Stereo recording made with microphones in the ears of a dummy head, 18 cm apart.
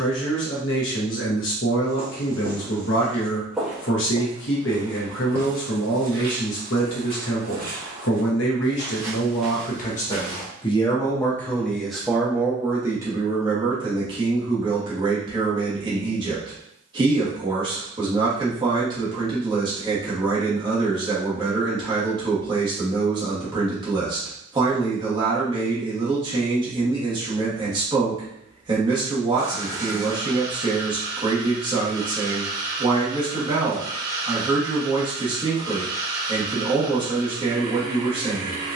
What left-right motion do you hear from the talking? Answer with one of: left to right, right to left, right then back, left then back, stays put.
left to right.